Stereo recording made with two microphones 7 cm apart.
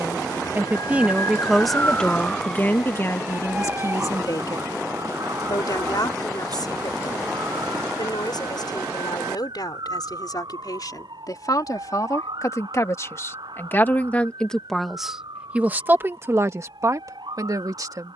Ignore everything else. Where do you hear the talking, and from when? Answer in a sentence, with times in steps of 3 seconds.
In this clip you hear the talking in the centre from 0 s, on the left from 3 s and on the right from 15 s.